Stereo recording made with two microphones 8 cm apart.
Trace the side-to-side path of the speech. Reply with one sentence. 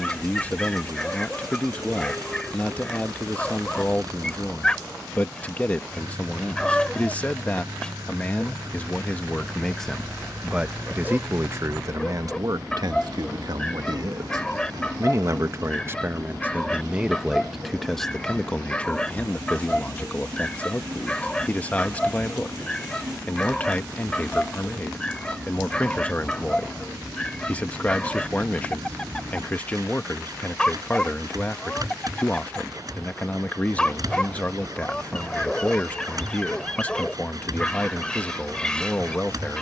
You can hear the speech move from left to right and back again.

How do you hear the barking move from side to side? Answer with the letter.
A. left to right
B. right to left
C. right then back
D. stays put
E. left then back
D.